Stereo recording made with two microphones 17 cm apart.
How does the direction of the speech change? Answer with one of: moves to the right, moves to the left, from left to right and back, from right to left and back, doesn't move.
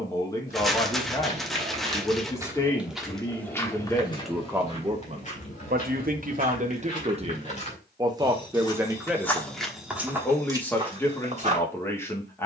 from left to right and back.